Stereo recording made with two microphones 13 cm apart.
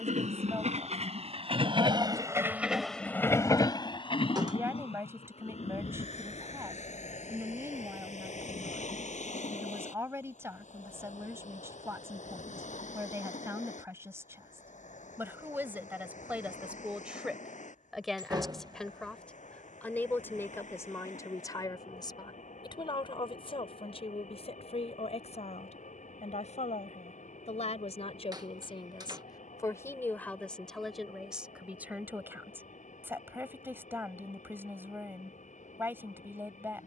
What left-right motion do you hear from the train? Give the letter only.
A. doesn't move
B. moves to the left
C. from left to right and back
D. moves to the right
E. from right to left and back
B.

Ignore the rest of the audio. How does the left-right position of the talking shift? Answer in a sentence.
In this clip you hear the talking go left and come back.